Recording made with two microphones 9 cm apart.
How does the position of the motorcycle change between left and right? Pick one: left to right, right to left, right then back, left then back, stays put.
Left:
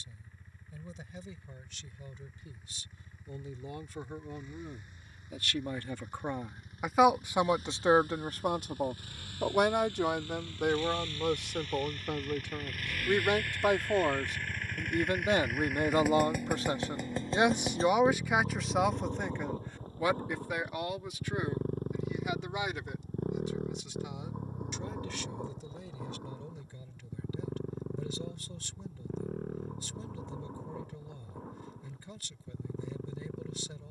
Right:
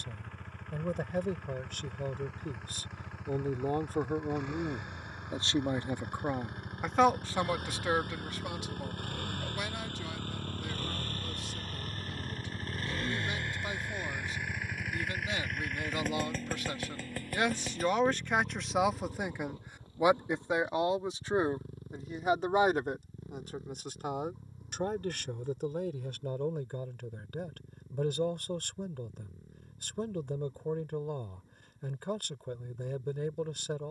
right to left.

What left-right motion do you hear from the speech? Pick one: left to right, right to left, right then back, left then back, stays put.
left then back.